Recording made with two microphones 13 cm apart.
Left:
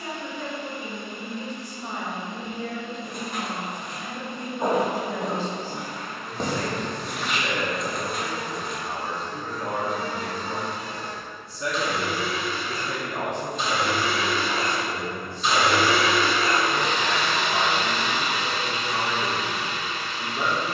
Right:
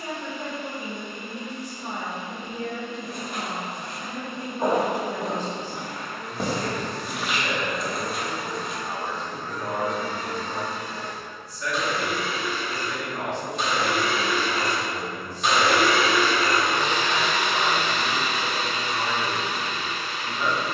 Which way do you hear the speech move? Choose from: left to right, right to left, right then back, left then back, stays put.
right to left.